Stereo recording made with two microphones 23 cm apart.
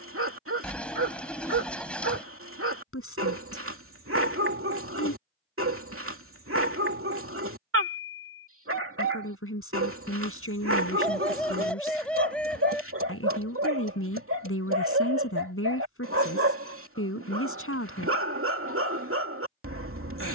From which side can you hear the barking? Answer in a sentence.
You can hear the barking on the right.